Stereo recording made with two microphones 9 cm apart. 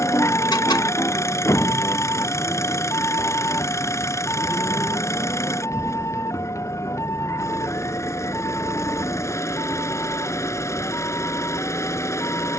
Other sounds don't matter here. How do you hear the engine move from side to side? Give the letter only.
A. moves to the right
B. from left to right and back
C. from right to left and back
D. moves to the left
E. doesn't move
E.